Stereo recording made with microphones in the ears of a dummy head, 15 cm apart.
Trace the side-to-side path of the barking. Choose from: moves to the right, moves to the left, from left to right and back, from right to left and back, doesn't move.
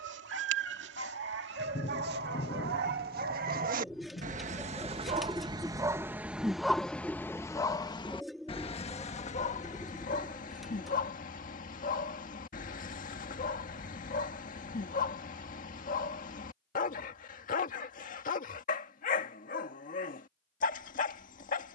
moves to the left.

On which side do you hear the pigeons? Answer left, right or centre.
centre.